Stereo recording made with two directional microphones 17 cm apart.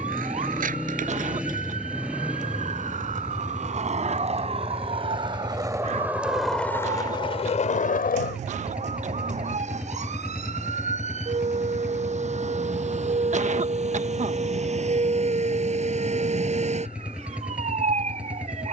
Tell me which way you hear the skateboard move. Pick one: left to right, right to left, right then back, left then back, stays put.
right to left.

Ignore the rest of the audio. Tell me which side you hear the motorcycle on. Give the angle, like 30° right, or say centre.
10° right.